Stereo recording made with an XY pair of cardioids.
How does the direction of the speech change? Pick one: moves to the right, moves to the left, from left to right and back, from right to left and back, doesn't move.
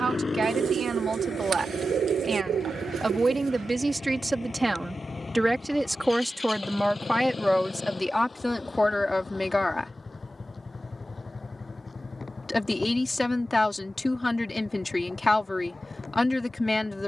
moves to the left.